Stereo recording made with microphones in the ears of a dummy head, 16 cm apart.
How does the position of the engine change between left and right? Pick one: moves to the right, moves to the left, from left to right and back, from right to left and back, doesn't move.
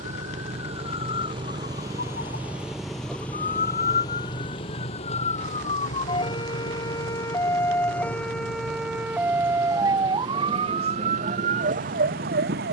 moves to the left.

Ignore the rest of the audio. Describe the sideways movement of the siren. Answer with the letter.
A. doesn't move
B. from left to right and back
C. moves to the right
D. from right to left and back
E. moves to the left
C.